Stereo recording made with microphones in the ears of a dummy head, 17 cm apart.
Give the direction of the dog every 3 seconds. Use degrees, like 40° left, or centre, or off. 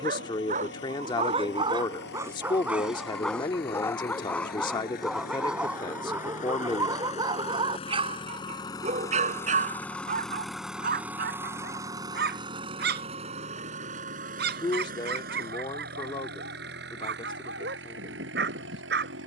30° right, centre, 20° right, 40° right, 60° right, 60° right, 60° right.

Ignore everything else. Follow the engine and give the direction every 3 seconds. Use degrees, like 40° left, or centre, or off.
60° left, 50° left, 30° left, centre, 40° right, 60° right, 60° right.